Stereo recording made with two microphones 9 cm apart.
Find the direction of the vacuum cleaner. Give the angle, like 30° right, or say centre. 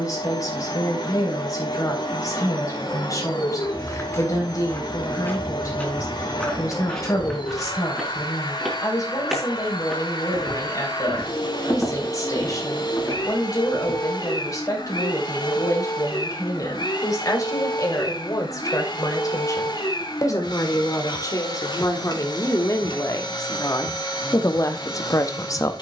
60° left.